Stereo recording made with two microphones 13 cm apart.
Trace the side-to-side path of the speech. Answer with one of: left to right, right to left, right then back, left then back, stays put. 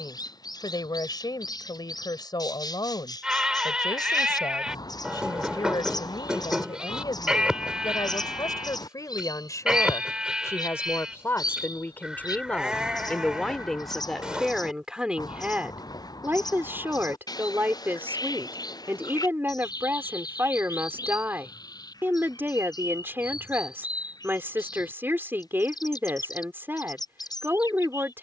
left to right.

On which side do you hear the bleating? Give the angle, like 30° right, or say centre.
10° right.